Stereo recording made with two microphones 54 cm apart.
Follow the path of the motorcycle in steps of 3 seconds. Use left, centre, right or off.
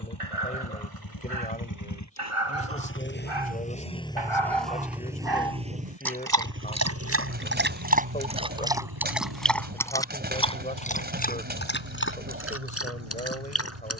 left, centre, right, right, right.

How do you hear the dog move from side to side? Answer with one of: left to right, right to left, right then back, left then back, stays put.
right to left.